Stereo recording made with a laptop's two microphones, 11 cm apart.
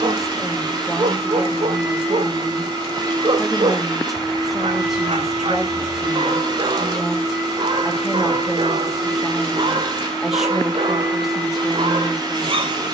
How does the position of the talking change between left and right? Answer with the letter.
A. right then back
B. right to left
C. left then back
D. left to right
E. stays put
E.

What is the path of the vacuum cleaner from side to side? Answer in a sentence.
In this clip you hear the vacuum cleaner stay put.